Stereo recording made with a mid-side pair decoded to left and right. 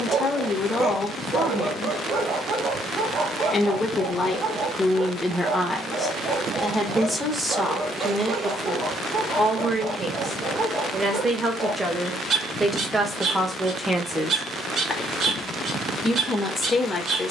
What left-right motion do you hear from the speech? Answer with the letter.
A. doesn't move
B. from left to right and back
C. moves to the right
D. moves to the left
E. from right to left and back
B.